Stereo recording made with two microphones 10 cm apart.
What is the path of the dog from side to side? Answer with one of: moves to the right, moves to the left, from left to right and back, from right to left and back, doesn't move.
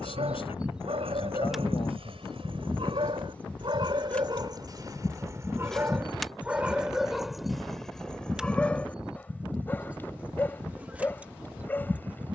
moves to the left.